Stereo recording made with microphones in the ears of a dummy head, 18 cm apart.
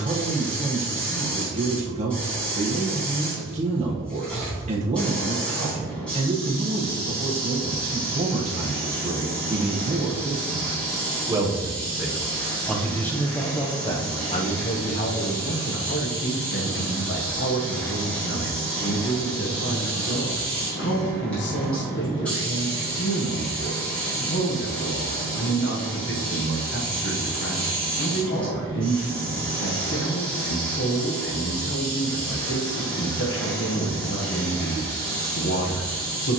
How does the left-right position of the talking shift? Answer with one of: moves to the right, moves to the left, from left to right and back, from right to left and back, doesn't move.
moves to the left.